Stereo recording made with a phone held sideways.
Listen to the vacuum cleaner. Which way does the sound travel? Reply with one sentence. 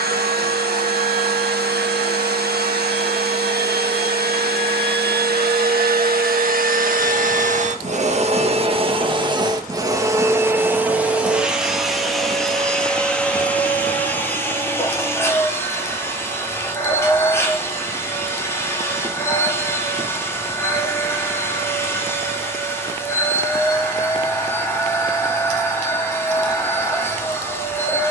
In this clip you hear the vacuum cleaner travel towards the left.